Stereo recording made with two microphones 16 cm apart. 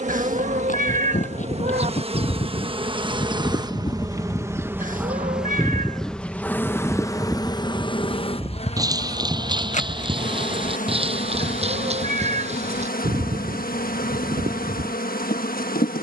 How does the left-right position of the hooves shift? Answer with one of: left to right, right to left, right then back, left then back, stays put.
left to right.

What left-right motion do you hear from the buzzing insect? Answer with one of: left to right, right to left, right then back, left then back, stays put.
right to left.